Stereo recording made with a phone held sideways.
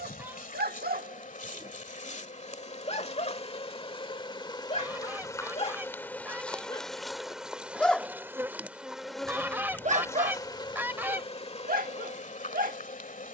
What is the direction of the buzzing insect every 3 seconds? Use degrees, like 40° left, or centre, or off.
50° left, 30° left, centre, 20° left, 50° left.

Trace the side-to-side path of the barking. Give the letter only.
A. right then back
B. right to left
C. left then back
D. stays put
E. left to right
C.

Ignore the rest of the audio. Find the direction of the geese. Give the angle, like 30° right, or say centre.
10° right.